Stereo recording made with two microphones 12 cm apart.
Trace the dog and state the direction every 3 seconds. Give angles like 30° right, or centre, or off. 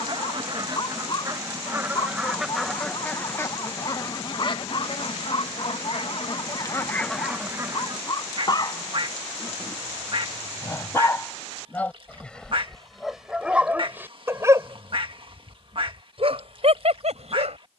40° left, 40° left, 40° left, 20° left, 10° right, 50° right.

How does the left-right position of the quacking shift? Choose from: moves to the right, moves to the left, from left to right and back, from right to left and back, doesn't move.
from right to left and back.